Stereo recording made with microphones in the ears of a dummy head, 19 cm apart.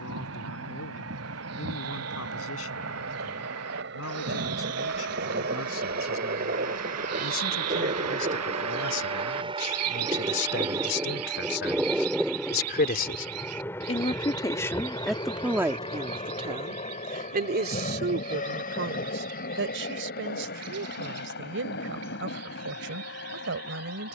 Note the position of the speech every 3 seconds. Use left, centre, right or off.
left, left, left, left, left, right, right, right.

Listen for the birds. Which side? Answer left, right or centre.
right.